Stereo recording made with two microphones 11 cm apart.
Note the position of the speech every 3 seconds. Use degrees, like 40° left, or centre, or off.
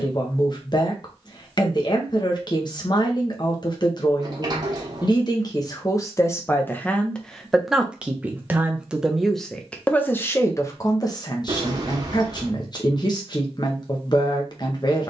40° left, 40° left, centre, 20° left, 40° left.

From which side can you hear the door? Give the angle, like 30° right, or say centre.
40° right.